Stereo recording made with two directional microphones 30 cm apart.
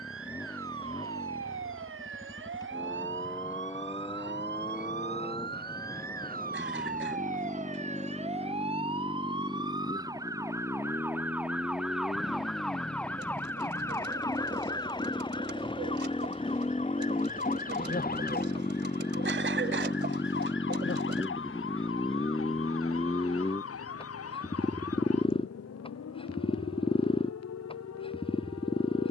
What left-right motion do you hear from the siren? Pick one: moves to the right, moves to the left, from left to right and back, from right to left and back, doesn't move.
moves to the left.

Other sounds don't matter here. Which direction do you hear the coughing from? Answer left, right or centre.
right.